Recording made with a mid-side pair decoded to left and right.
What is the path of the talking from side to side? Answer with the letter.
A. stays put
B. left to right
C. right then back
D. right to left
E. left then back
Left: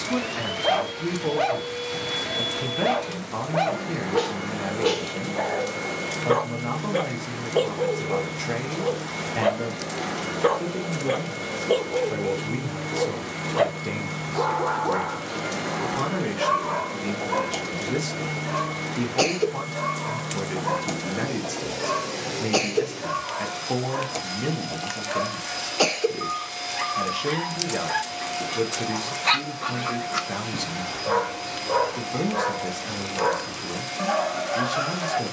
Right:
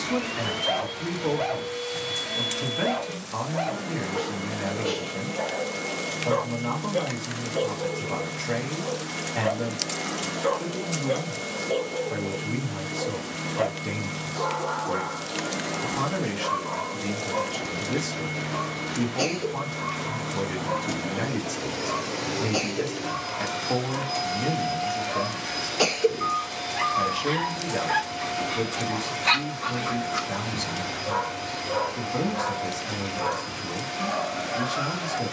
A.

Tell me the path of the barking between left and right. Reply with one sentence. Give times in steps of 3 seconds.
In this clip you hear the barking on the left from 0 s, in the centre from 27 s and on the left from 30 s.